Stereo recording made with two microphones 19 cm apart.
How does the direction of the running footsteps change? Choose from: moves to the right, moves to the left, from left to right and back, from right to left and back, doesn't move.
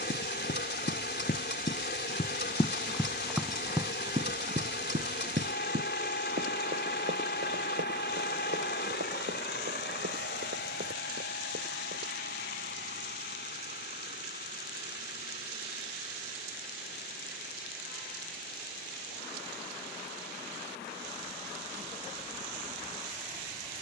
moves to the right.